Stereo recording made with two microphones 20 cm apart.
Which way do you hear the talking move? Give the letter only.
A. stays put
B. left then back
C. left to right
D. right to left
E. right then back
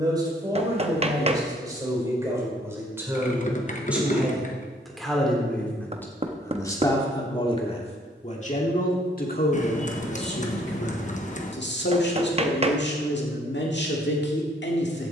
D.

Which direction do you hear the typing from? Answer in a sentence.
In this clip you hear the typing on the left.